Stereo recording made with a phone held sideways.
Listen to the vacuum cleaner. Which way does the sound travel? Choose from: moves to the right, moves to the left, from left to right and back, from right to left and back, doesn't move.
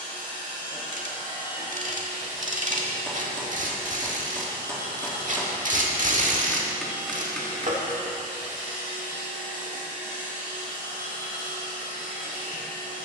doesn't move.